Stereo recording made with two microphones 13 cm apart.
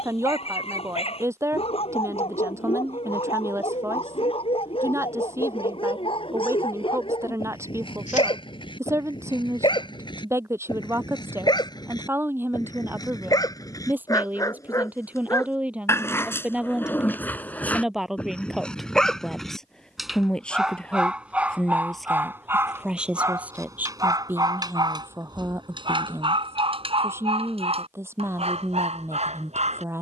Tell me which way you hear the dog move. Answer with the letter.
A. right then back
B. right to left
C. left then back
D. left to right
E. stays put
D.